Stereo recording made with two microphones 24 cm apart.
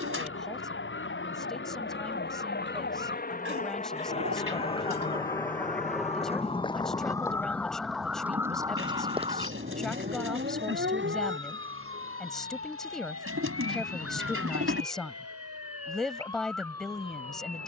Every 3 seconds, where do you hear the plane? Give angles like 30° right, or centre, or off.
60° left, 20° left, 20° right, 50° right, 60° right, 60° right.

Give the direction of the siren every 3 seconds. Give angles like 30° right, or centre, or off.
60° left, 40° left, 10° left, 40° right, 70° right, 80° right.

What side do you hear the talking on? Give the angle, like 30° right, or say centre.
centre.